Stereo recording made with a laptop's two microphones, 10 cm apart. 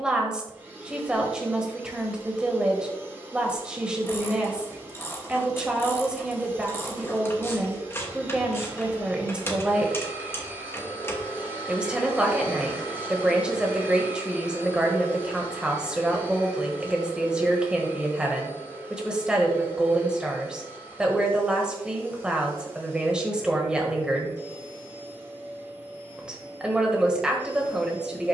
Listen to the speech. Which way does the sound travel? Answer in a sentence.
You can hear the speech stay put.